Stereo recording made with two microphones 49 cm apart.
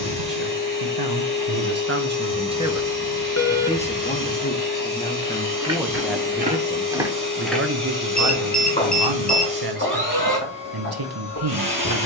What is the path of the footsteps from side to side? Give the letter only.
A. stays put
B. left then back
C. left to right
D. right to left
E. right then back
D.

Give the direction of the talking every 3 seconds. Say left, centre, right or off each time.
right, centre, right, right.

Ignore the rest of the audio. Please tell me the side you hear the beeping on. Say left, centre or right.
left.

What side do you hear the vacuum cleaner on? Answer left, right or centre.
left.